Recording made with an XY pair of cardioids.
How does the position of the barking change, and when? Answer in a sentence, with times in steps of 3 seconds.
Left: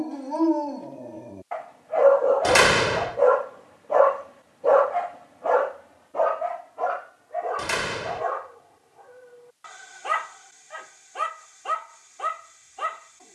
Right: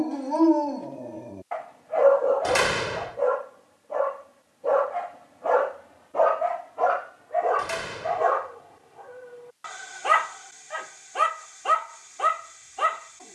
You can hear the barking in the centre from 0 s, on the left from 3 s and on the right from 6 s.